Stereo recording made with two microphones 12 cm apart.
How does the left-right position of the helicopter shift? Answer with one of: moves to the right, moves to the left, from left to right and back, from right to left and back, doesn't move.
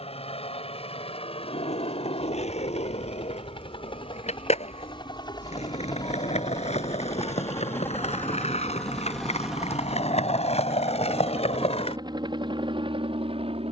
moves to the right.